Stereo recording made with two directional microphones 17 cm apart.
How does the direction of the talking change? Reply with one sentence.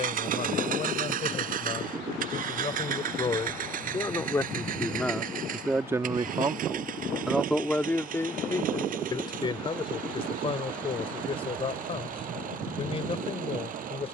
In this clip you hear the talking move from left to right and back again.